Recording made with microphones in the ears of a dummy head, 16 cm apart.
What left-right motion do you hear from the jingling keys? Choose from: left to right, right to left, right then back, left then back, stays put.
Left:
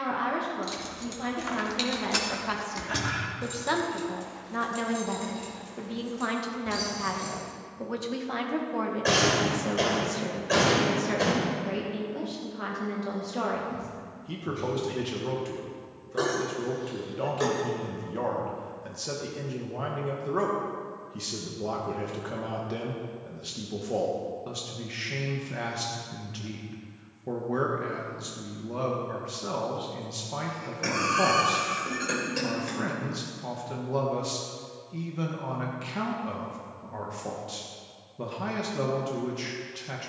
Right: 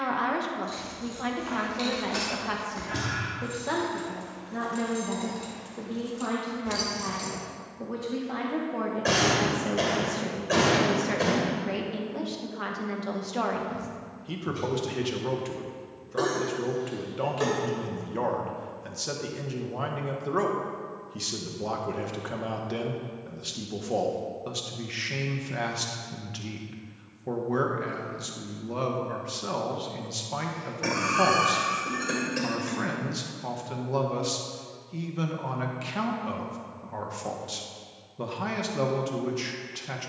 left to right.